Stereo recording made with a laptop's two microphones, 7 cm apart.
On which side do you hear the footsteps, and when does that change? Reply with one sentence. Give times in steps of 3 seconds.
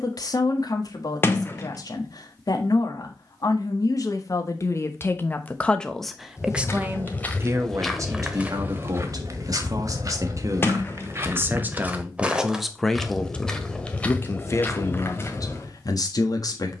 You can hear the footsteps not at all from 0 s, in the centre from 6 s, on the right from 9 s, in the centre from 12 s and on the left from 15 s.